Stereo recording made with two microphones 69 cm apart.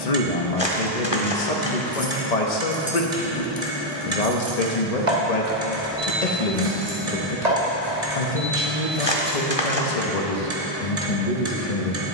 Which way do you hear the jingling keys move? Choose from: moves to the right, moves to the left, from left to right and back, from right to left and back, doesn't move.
moves to the right.